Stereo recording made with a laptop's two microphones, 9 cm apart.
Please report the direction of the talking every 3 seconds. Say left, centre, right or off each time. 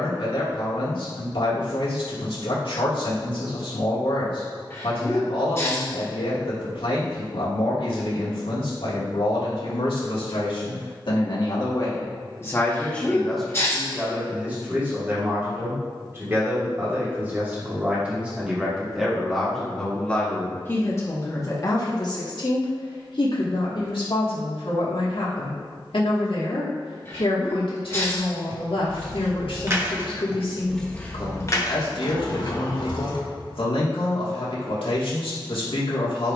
left, left, left, left, centre, right, centre, left, left, left, left, left.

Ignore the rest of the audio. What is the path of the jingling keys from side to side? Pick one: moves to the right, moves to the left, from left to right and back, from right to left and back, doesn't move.
moves to the left.